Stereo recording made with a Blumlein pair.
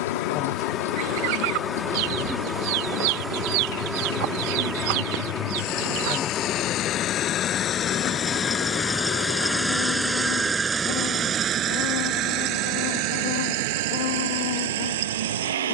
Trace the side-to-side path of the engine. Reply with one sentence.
You can hear the engine move from left to right.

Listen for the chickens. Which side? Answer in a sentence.
You can hear the chickens on the right.